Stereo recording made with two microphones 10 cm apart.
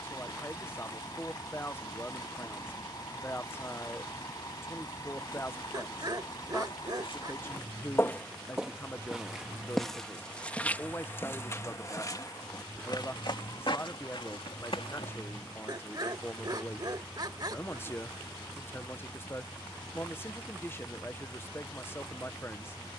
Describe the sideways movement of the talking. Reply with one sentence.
You can hear the talking stay in one place.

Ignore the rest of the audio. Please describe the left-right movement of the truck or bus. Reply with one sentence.
In this clip you hear the truck or bus stay in one place.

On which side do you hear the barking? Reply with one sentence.
You can hear the barking on the right.